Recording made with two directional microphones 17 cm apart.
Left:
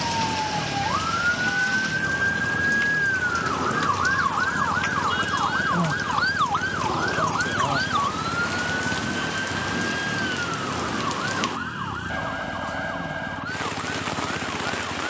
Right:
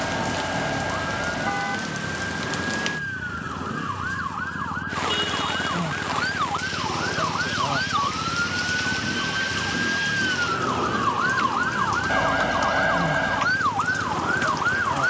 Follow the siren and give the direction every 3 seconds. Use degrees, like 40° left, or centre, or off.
50° left, 30° left, 10° left, 30° right, 60° right.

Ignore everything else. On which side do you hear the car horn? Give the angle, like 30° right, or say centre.
40° right.